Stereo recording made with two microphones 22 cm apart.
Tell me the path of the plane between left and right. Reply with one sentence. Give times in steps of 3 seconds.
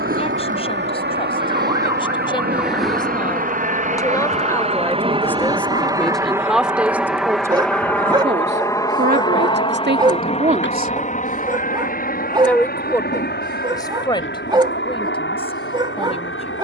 You can hear the plane on the right from 0 s, in the centre from 6 s and on the left from 9 s.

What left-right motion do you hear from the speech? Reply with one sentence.
You can hear the speech move from left to right and back again.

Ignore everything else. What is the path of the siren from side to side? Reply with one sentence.
In this clip you hear the siren travel towards the left.